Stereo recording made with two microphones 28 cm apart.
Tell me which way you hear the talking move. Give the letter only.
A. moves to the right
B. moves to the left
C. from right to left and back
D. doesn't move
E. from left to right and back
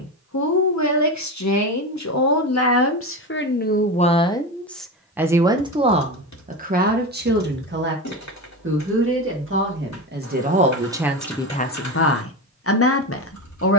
E.